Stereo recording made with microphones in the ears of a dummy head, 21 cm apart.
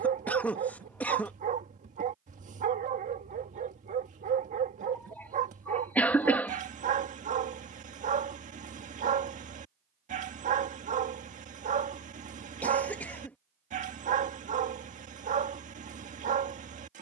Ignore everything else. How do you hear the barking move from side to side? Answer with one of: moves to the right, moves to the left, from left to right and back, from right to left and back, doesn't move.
doesn't move.